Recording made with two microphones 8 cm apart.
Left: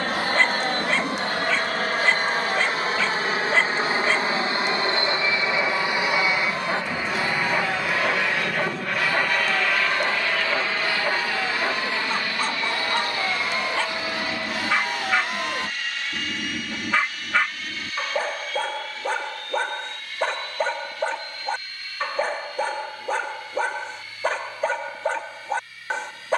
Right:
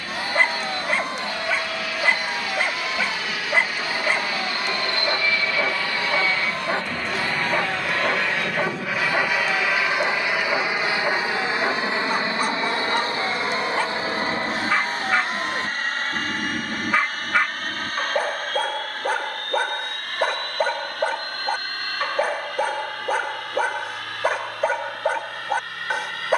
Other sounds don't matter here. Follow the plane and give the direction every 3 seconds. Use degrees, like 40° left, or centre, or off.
50° left, 30° left, 10° left, 10° right, 30° right, 40° right, 50° right, 50° right, 60° right.